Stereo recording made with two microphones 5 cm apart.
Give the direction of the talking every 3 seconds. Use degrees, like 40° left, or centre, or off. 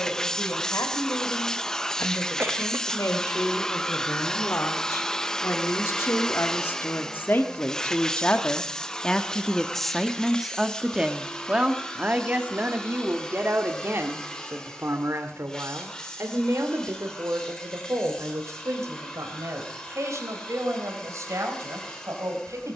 70° left, 60° left, 40° left, 10° right, 40° right, 60° right, 60° right, 70° right.